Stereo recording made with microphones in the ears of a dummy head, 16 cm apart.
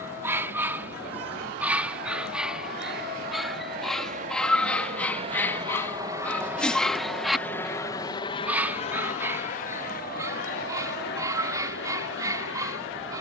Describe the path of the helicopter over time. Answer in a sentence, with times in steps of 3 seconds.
In this clip you hear the helicopter on the right from 0 s, in the centre from 6 s and on the left from 9 s.